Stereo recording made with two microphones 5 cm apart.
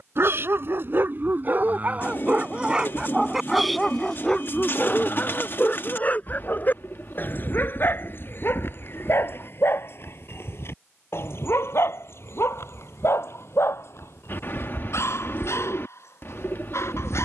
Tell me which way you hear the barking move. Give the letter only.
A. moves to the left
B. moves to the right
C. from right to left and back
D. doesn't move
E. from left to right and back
A.